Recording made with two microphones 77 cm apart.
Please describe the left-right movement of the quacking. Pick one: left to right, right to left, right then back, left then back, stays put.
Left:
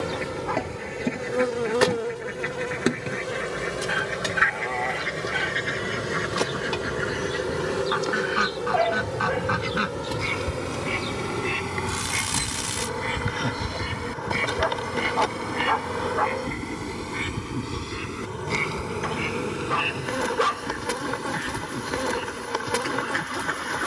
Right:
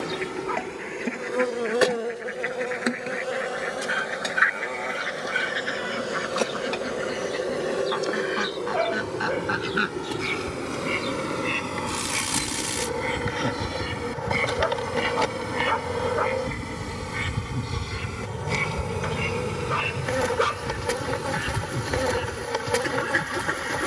left to right.